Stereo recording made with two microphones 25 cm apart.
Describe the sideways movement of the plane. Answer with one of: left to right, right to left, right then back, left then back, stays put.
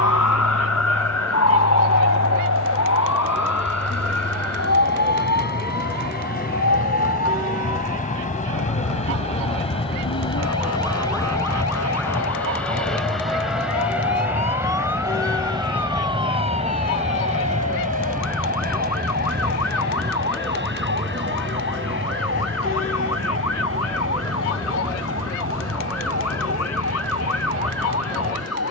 left to right.